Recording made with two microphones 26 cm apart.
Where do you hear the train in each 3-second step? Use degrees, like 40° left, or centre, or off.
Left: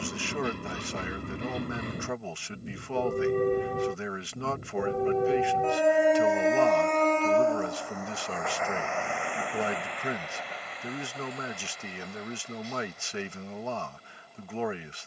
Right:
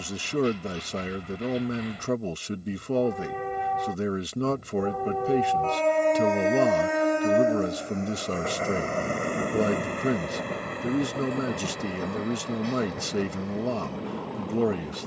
50° left, 30° left, 20° right, 50° right, 70° right.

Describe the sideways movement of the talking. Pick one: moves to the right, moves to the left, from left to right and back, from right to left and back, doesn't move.
doesn't move.